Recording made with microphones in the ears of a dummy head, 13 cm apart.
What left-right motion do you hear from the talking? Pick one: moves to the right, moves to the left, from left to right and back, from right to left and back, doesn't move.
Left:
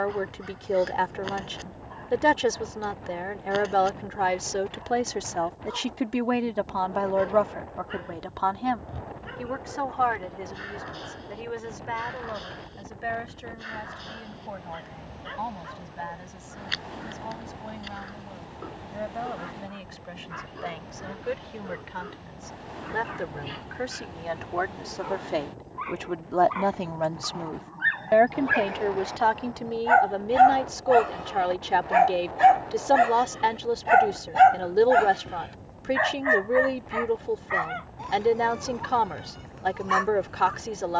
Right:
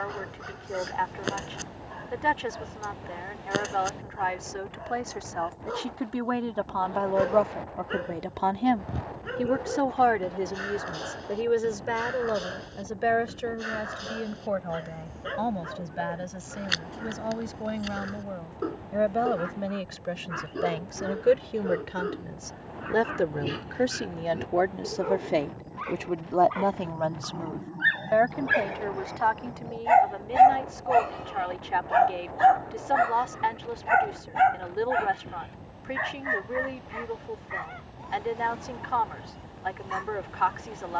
from left to right and back.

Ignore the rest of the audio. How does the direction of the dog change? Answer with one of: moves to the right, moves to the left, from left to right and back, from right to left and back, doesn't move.
moves to the left.